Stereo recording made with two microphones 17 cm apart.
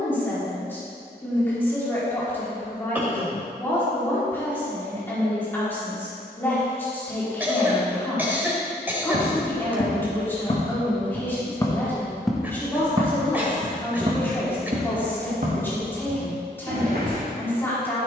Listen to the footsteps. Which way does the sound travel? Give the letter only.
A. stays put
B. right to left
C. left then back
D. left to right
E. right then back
D.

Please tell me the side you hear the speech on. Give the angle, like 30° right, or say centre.
10° left.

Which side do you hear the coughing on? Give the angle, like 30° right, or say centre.
10° right.